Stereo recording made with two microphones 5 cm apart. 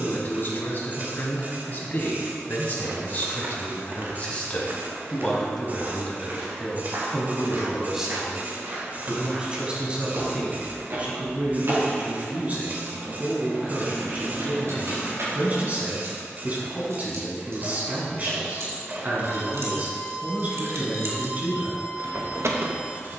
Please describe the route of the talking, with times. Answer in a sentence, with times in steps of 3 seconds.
In this clip you hear the talking on the left from 0 s, in the centre from 6 s and on the right from 9 s.